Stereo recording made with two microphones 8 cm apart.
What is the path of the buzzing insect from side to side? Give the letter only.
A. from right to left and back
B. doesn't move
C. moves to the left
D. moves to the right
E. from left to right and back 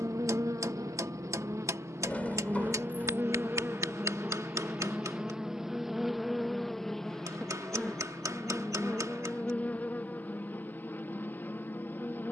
C.